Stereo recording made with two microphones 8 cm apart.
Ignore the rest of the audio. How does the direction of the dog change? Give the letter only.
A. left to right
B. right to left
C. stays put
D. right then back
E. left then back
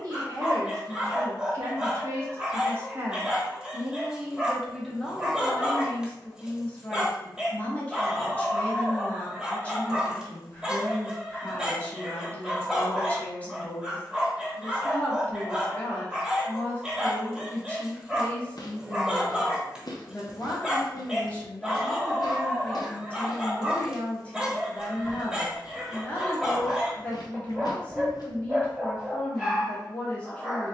C.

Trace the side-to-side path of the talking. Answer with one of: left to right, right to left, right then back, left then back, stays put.
right to left.